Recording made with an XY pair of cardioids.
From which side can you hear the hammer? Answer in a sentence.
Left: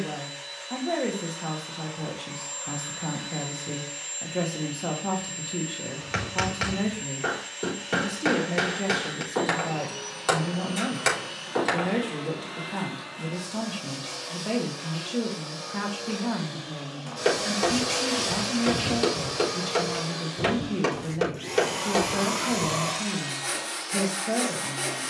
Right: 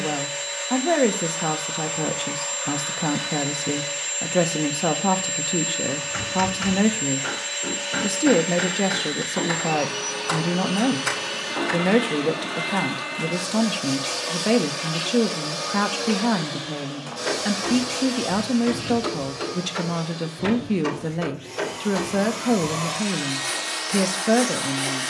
You can hear the hammer on the left.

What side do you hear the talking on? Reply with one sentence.
In this clip you hear the talking on the right.